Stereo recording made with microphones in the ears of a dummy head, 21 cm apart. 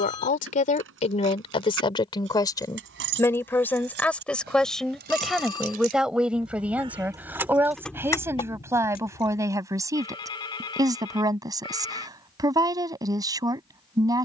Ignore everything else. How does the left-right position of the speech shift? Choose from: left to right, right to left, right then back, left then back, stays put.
left to right.